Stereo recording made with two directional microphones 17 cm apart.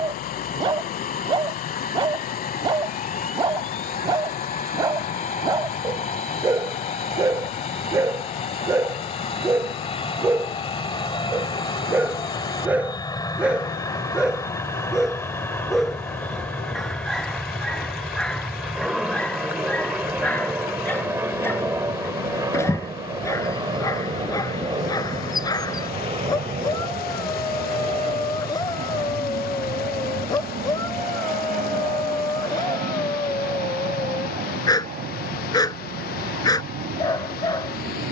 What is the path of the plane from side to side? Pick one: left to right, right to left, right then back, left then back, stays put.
left to right.